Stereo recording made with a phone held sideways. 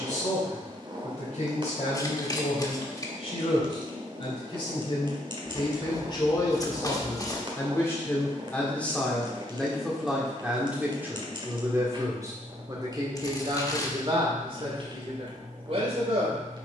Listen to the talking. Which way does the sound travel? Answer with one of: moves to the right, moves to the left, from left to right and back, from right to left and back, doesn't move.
moves to the right.